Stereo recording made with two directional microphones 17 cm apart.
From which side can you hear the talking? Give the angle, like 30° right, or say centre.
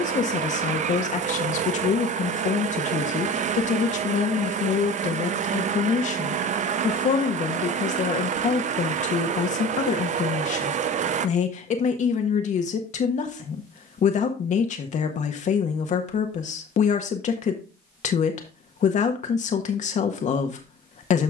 40° left.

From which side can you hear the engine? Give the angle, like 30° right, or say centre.
40° right.